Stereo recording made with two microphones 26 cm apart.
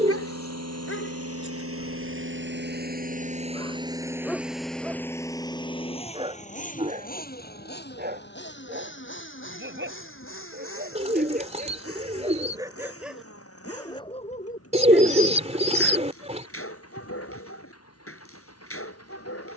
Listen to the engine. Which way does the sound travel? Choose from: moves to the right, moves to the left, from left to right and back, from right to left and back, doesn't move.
moves to the left.